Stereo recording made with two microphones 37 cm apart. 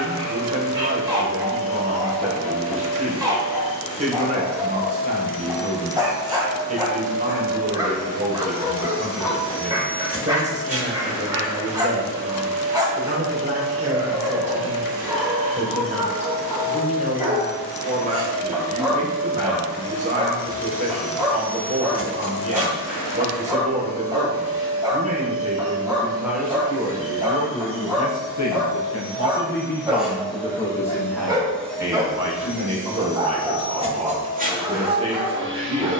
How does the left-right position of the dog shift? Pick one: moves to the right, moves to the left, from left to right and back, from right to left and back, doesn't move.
doesn't move.